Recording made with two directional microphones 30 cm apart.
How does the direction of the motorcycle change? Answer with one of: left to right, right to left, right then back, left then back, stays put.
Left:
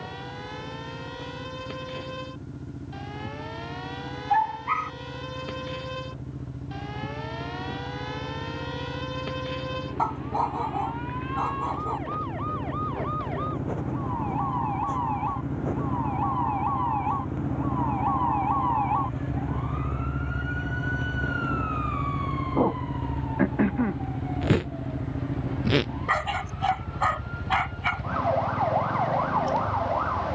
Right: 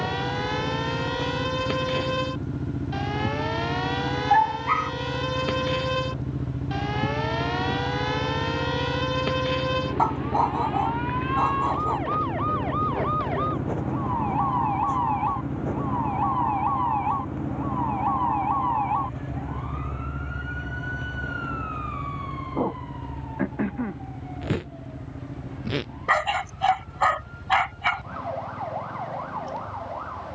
right to left.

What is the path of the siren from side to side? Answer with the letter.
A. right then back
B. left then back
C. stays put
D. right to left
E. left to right
D.